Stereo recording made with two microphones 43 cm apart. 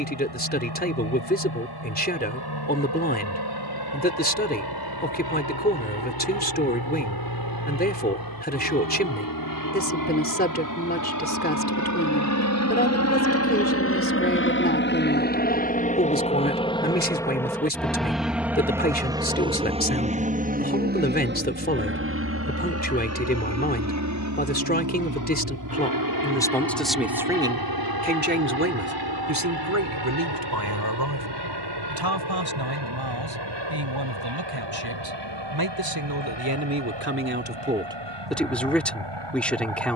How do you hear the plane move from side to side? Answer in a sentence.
You can hear the plane move to the right.